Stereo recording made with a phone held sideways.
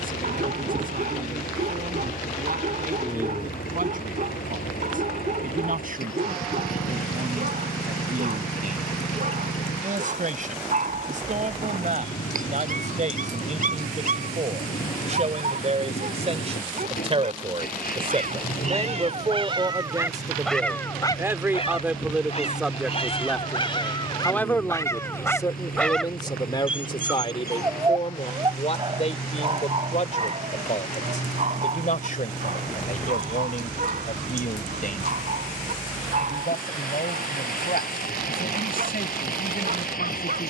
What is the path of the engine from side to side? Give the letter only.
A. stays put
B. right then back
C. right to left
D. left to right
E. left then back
A.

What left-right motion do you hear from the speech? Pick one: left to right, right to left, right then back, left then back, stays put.
right to left.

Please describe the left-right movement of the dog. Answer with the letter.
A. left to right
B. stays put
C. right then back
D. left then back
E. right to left
D.